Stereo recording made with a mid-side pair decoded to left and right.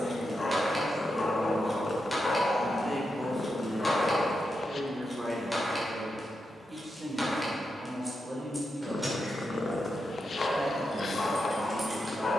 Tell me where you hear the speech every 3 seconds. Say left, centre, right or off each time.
left, centre, right, right.